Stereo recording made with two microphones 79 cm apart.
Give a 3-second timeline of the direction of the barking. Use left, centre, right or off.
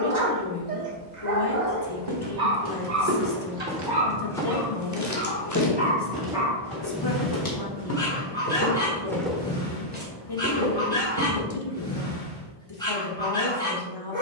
right, right, centre, centre, centre.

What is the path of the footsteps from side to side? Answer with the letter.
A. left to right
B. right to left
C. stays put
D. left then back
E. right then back
D.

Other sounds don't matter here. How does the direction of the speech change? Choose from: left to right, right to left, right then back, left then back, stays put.
stays put.